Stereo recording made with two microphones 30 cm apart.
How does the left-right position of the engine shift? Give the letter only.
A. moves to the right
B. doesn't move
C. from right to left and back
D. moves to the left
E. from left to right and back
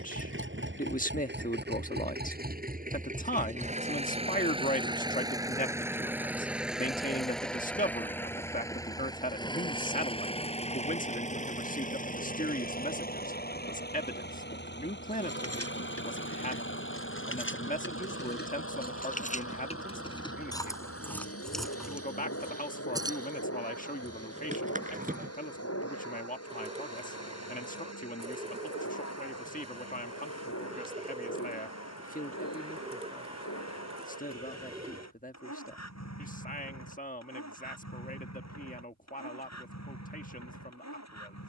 D.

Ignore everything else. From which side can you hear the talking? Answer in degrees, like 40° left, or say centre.
30° left.